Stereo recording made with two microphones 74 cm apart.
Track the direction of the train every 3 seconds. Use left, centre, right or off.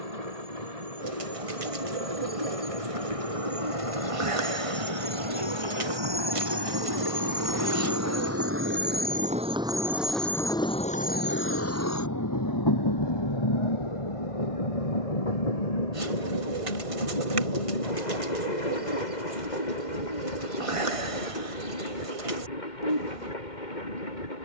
right, right, right, centre, left, left, left, left.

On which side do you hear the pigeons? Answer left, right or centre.
right.